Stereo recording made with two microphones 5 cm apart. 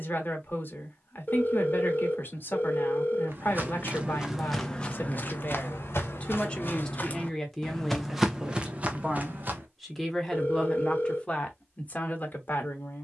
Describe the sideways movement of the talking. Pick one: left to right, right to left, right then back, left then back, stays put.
right then back.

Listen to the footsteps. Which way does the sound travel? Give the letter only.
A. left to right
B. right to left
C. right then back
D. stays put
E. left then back
E.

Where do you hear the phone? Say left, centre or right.
left.